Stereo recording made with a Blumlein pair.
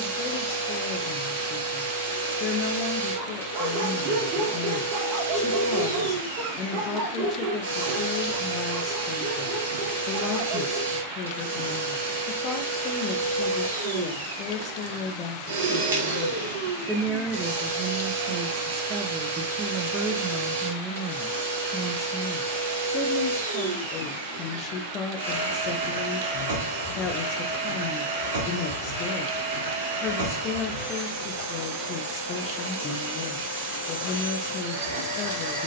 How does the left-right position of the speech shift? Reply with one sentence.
In this clip you hear the speech go right and come back.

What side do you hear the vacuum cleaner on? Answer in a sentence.
In this clip you hear the vacuum cleaner on the right.